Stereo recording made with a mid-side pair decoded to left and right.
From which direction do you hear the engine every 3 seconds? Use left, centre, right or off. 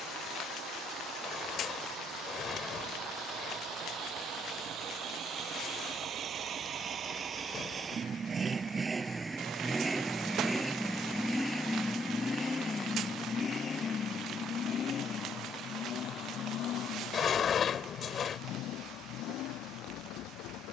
right, right, right, centre, left, left, left.